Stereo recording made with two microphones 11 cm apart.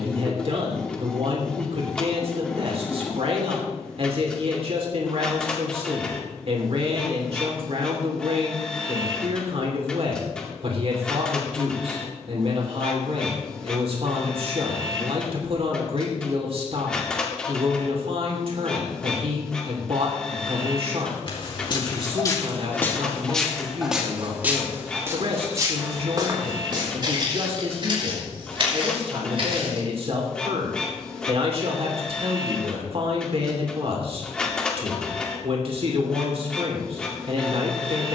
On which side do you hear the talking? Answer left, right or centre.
right.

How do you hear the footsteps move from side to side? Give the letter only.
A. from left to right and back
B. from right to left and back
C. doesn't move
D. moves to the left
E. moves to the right
E.